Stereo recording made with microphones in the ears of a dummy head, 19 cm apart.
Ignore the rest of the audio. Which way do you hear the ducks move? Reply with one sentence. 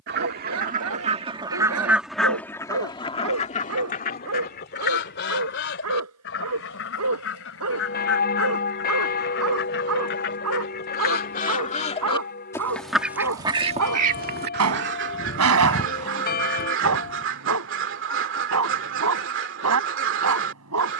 You can hear the ducks go left and come back.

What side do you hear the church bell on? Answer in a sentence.
In this clip you hear the church bell on the left.